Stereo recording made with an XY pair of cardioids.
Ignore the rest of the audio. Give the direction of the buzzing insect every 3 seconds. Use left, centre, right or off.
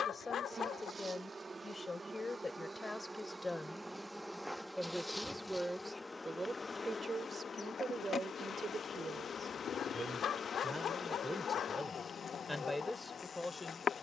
right, centre, left, left, left.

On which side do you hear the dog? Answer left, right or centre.
left.